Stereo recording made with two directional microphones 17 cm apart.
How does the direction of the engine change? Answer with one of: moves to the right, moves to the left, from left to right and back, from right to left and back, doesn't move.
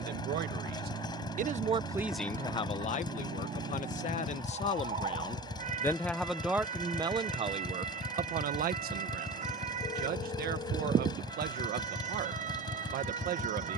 doesn't move.